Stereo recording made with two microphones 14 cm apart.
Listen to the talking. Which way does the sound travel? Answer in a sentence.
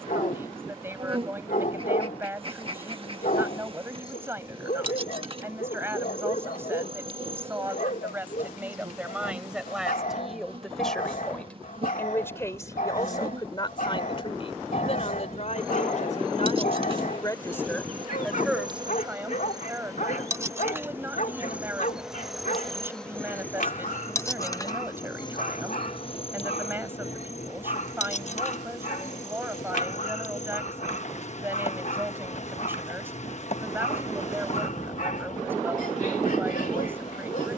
You can hear the talking go left and come back.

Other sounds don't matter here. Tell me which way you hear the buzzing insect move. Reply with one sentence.
You can hear the buzzing insect move from right to left.